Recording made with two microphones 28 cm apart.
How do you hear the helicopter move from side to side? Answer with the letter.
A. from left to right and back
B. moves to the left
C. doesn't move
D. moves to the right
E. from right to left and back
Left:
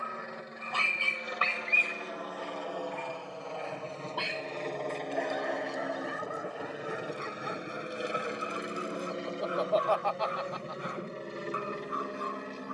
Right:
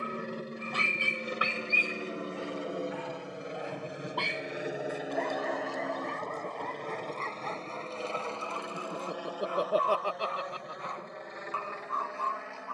B.